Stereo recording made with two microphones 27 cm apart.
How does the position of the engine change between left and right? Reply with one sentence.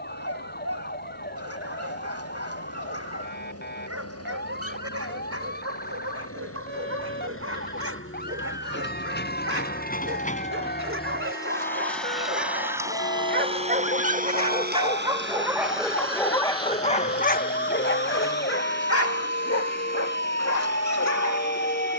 In this clip you hear the engine move from left to right.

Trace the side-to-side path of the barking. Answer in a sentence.
In this clip you hear the barking move to the left.